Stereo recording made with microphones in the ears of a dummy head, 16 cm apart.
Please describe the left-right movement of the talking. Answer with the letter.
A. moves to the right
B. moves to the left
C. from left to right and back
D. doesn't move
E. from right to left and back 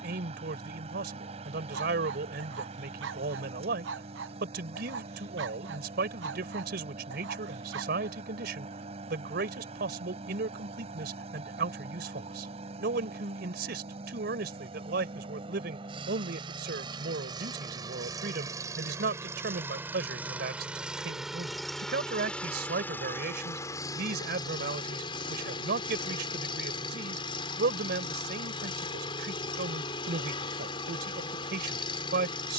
D.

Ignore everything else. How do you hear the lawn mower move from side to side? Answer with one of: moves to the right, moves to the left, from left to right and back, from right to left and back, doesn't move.
moves to the left.